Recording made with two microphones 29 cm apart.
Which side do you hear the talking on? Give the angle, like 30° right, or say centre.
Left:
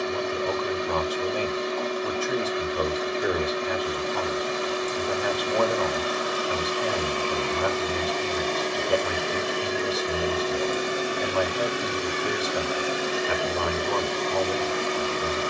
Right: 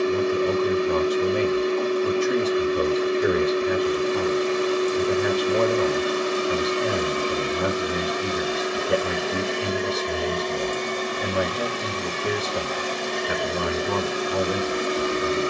30° right.